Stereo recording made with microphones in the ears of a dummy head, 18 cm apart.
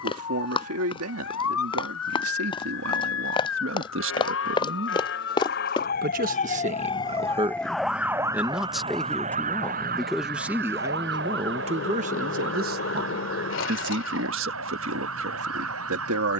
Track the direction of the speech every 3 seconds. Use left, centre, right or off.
right, right, right, centre, right, right.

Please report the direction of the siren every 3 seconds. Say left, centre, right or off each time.
left, left, centre, right, right, right.